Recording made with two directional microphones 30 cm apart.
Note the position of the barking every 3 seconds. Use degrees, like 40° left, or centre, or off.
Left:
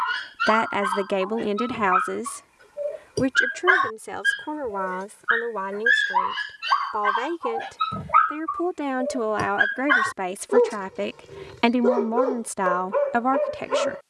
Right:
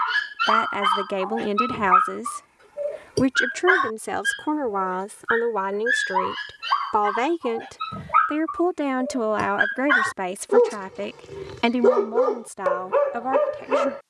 50° right, centre, 20° left, 20° right, 40° right.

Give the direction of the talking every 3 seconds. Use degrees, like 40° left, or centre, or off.
10° right, 50° right, 50° right, 10° right, 30° left.